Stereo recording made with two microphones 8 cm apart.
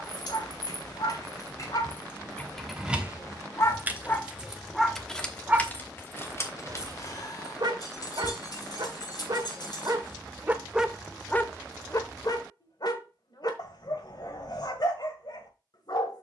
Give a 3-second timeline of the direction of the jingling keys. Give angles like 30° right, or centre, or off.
40° left, centre, 50° left, 60° left, off, off.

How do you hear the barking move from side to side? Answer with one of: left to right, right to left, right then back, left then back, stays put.
right then back.